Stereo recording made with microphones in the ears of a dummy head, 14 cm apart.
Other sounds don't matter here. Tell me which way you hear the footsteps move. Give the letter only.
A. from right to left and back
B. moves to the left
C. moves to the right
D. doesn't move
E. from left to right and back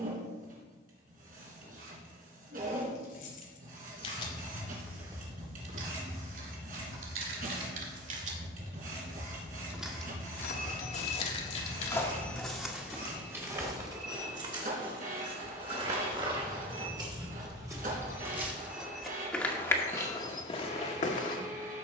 E.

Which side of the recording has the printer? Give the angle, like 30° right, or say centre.
60° right.